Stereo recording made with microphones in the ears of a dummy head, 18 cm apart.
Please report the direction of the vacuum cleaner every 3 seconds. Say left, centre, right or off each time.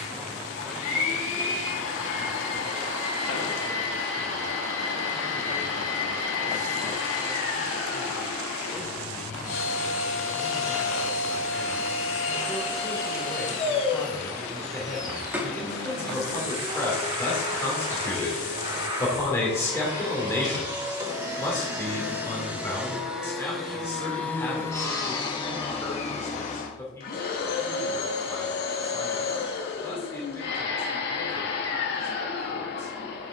left, left, left, left, left, right, right, centre, left, left, left.